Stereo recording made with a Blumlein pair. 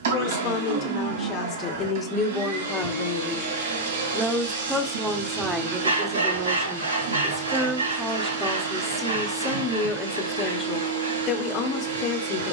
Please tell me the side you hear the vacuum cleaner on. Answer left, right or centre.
right.